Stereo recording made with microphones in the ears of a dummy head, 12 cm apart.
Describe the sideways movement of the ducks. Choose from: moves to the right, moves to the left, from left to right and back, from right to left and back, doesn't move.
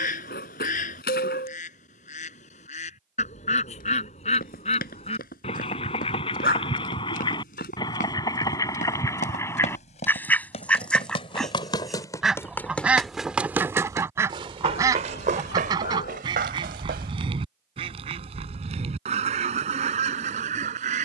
moves to the right.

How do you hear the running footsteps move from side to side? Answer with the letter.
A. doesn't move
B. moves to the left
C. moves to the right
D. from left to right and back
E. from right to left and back
C.